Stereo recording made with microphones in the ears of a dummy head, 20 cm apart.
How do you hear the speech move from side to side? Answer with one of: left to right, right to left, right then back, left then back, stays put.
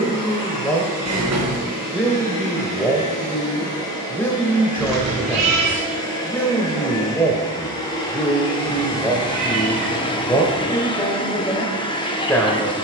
stays put.